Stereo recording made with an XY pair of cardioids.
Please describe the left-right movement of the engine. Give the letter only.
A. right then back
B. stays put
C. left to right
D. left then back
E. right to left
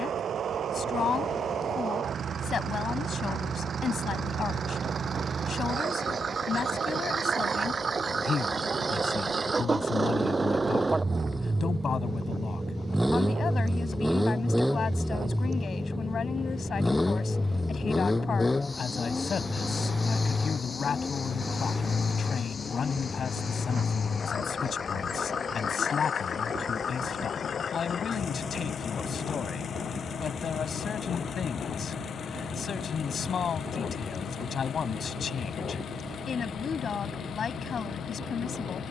E.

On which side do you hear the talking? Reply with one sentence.
In this clip you hear the talking on the left.